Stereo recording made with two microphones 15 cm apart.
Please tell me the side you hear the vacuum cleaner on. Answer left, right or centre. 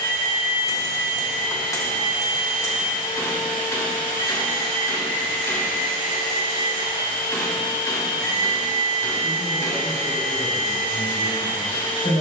left.